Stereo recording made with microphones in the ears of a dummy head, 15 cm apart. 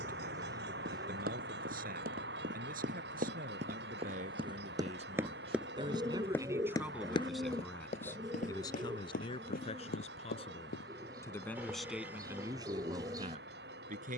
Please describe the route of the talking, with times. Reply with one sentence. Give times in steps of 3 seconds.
In this clip you hear the talking on the right from 0 s, in the centre from 6 s, on the left from 9 s and on the right from 12 s.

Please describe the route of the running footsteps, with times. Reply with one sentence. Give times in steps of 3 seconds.
You can hear the running footsteps on the right from 0 s, on the left from 6 s and not at all from 12 s.